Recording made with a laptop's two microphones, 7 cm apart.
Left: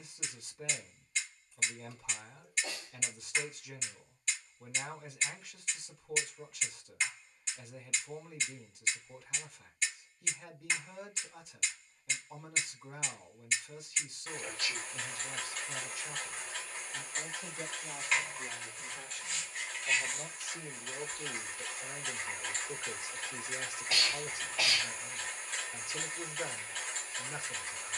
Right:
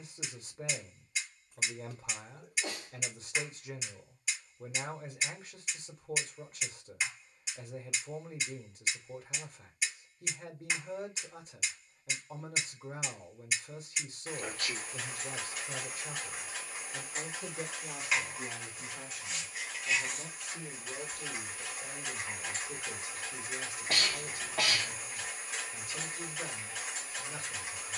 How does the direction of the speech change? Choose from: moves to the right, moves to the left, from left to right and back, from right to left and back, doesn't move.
moves to the left.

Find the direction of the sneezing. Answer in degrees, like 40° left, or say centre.
60° right.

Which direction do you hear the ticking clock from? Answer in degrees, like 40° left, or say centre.
10° right.